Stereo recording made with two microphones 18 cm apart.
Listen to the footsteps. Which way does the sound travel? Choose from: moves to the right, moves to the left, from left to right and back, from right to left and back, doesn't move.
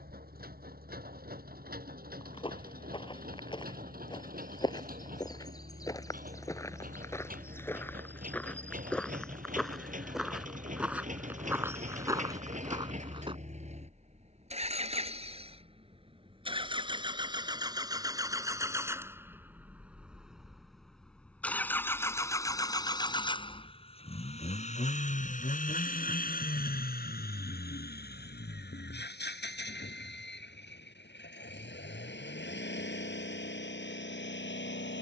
moves to the right.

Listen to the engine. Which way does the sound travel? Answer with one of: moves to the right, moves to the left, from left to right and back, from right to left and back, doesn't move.
moves to the left.